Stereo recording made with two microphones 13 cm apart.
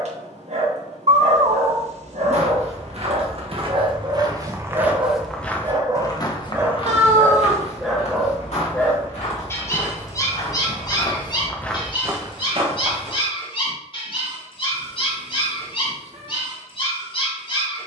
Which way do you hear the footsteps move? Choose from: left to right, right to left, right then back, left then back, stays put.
left then back.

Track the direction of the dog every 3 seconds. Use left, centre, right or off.
right, right, centre, left, left, left.